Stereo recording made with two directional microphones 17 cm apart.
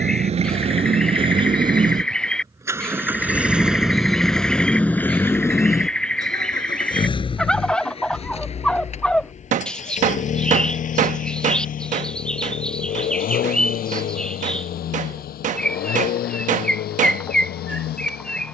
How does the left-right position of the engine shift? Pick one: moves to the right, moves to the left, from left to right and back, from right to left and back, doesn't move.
moves to the left.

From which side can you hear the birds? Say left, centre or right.
centre.